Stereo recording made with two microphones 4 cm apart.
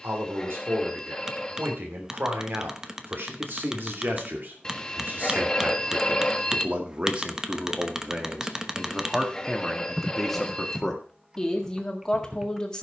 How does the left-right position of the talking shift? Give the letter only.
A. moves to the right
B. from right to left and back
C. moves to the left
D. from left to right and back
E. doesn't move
C.